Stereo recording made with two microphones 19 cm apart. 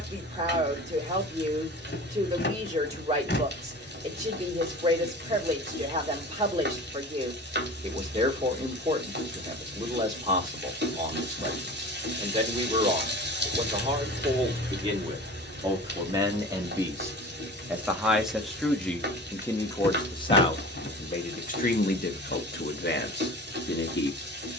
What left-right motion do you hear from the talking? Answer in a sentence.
In this clip you hear the talking move to the left.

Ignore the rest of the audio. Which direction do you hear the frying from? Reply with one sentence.
You can hear the frying on the right.